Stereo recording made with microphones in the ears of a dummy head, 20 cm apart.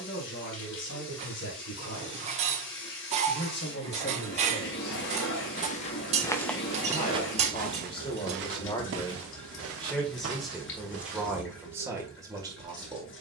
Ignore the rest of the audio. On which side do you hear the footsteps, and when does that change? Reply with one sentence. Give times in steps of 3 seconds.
You can hear the footsteps not at all from 0 s, on the left from 3 s, on the right from 6 s and not at all from 12 s.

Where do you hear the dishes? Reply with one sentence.
In this clip you hear the dishes on the right.